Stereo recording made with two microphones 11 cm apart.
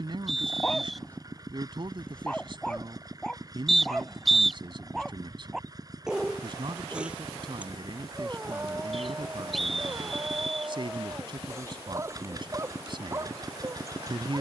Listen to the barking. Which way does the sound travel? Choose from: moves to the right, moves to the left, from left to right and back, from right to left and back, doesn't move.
moves to the right.